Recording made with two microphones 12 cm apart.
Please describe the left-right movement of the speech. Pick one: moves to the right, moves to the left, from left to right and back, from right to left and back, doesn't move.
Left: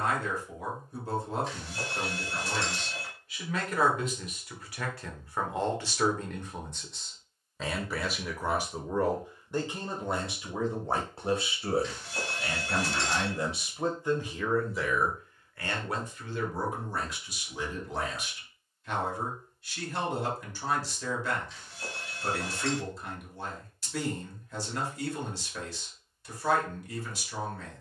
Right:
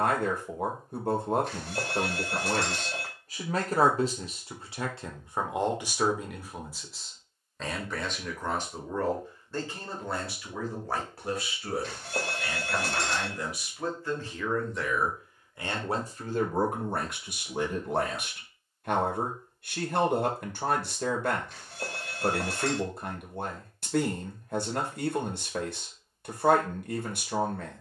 from right to left and back.